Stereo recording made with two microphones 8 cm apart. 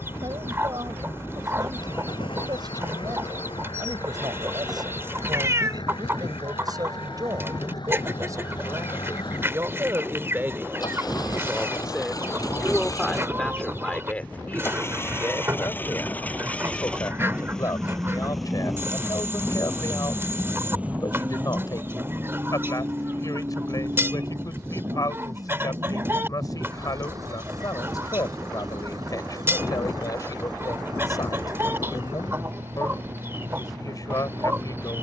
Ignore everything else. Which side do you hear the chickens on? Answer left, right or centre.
right.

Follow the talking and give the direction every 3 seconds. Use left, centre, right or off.
right, right, right, right, centre, left, left, left, left, left, left, left.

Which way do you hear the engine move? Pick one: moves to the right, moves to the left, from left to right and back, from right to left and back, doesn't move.
moves to the right.